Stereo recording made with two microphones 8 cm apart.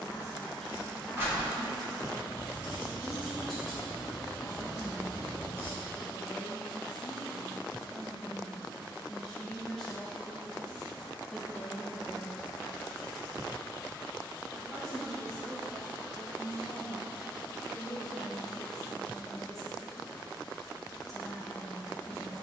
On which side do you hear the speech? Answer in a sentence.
In this clip you hear the speech in the centre.